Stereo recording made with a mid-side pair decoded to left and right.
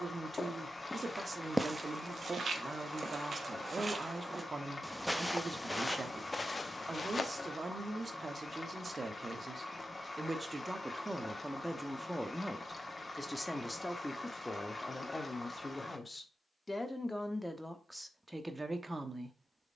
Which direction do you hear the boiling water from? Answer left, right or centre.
left.